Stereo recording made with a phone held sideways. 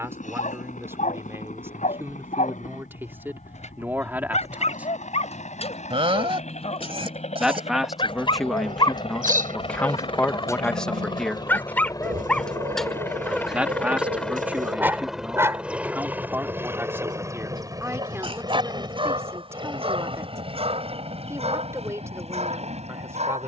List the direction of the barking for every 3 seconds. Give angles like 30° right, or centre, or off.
60° left, 50° left, 40° left, 20° left, centre, 30° right, 40° right, 50° right.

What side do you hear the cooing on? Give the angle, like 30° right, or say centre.
80° right.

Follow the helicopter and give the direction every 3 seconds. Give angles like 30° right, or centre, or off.
70° left, 60° left, 50° left, 40° left, 10° left, 10° right, 30° right, 50° right.